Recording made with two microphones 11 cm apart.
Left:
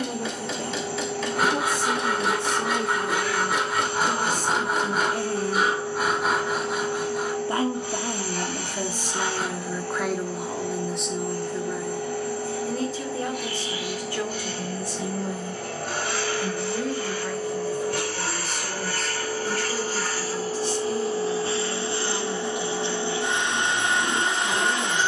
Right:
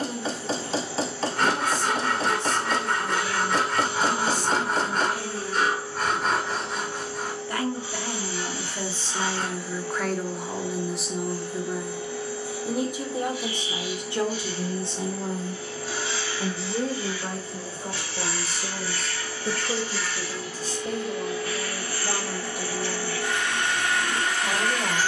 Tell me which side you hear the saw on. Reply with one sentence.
You can hear the saw in the centre.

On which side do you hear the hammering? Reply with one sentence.
In this clip you hear the hammering on the right.